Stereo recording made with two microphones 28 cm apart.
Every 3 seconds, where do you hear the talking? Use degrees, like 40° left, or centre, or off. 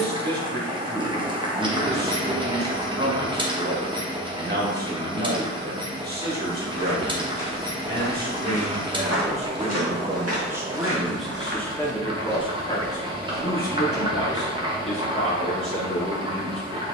40° right, 40° right, 30° right, 10° right, 30° left, 50° left.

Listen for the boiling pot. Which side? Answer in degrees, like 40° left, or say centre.
20° right.